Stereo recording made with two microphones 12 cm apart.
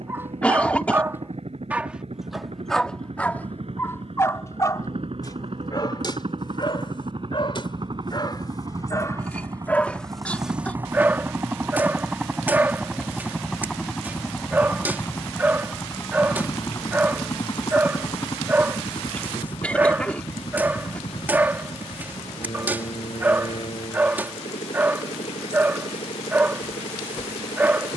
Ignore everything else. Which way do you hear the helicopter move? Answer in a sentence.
In this clip you hear the helicopter move to the left.